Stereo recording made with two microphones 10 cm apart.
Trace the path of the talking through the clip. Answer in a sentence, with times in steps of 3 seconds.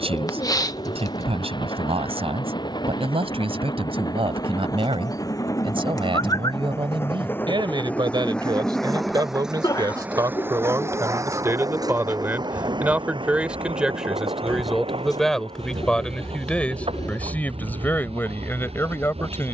You can hear the talking on the right from 0 s, in the centre from 12 s and on the left from 18 s.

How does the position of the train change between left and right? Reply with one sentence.
In this clip you hear the train move from left to right.